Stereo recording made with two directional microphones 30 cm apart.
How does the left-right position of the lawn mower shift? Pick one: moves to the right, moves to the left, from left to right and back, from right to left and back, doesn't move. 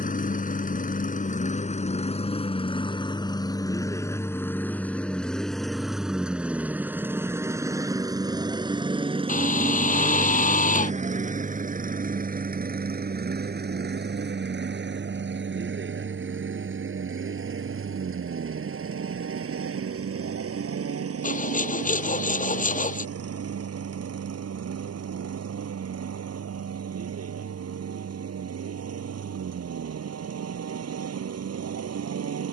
moves to the right.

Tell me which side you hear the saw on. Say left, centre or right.
left.